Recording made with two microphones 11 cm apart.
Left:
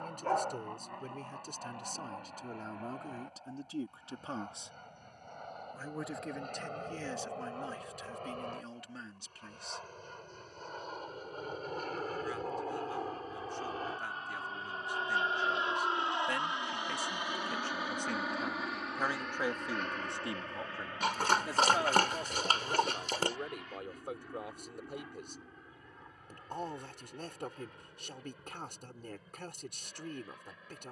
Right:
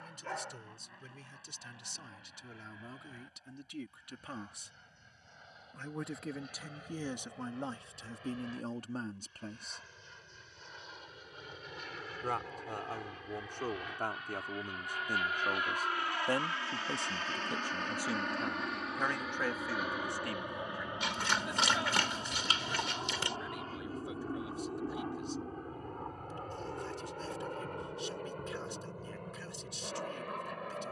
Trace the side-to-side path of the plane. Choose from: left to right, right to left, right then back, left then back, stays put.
left to right.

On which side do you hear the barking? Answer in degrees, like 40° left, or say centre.
50° left.